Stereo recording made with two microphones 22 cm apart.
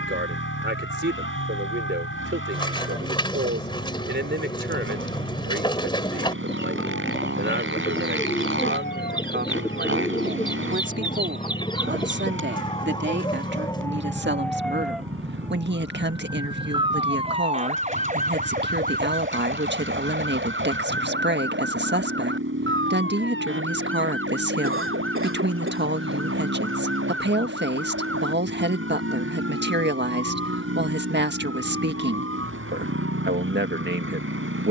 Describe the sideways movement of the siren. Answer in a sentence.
You can hear the siren move from left to right.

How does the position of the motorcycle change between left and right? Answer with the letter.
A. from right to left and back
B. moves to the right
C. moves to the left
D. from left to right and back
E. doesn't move
E.